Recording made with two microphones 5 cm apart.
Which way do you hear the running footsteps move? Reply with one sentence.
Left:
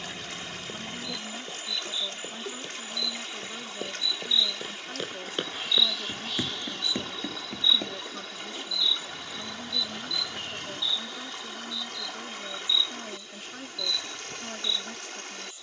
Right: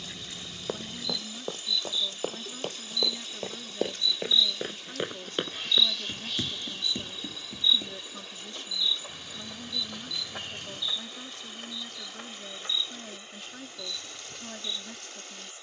You can hear the running footsteps travel towards the left.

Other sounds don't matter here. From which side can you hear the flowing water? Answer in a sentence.
In this clip you hear the flowing water on the left.